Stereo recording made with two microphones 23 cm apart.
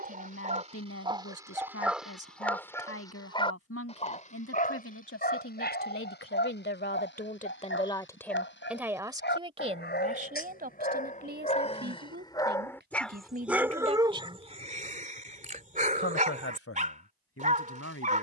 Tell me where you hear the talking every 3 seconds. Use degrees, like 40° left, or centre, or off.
80° left, 70° left, 30° left, 40° right, 40° right, 70° left.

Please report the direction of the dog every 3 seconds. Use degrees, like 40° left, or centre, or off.
10° right, 40° left, 50° left, 40° left, 10° right, 30° right.